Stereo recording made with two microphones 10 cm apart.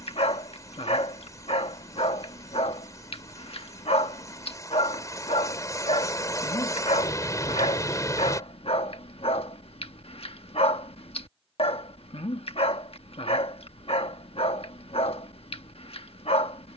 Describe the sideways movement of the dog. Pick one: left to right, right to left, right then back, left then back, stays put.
stays put.